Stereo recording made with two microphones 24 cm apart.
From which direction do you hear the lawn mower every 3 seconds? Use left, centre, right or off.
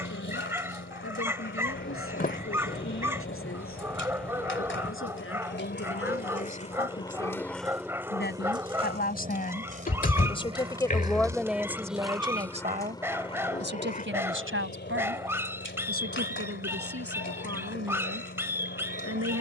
left, left, centre, right, left, left, left.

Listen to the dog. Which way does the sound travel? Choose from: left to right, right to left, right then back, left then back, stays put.
stays put.